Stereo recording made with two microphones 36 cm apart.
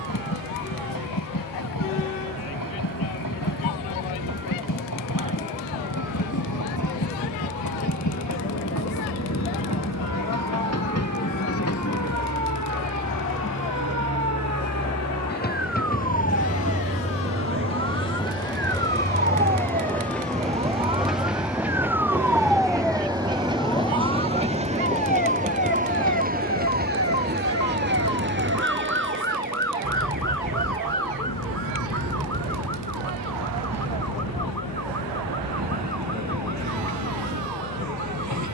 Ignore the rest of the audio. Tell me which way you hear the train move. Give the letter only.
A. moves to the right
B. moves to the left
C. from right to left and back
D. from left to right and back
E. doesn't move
A.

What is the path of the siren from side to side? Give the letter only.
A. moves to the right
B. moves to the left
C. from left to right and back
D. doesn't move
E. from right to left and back
B.